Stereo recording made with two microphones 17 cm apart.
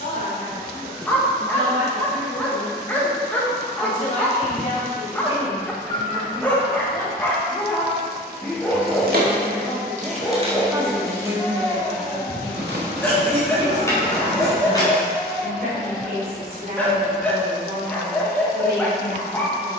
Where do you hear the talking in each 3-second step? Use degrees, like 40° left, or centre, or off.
50° left, 40° left, 20° left, 20° right, 40° right, 60° right, 70° right.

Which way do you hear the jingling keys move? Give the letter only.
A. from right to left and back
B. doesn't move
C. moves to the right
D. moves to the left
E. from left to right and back
D.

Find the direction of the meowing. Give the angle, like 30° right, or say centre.
80° right.